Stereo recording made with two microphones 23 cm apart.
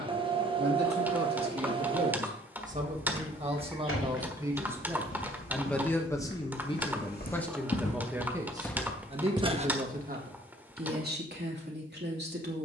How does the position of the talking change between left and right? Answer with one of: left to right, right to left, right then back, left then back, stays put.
left then back.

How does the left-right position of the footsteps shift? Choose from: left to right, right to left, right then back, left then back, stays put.
left to right.